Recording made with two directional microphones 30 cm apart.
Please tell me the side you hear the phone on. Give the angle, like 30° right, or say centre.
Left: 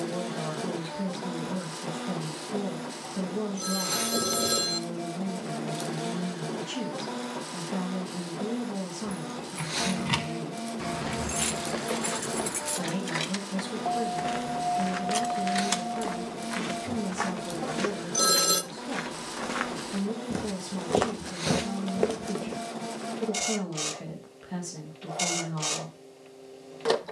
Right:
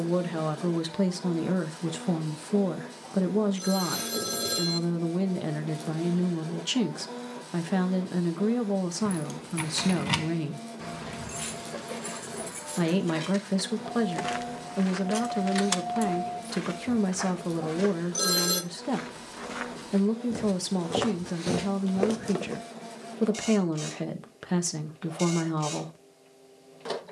20° left.